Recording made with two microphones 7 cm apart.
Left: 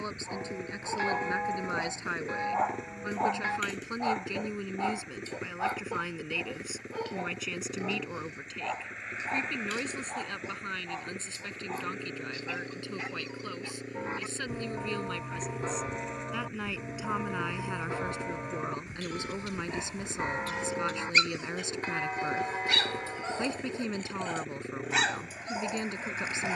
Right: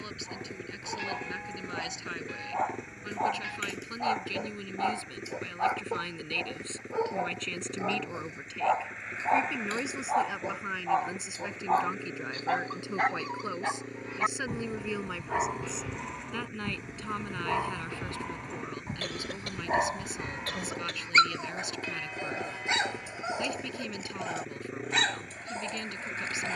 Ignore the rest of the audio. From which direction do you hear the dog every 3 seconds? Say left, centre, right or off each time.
centre, centre, right, right, right, right, right, right, centre.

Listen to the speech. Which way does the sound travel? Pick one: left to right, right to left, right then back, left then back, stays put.
right then back.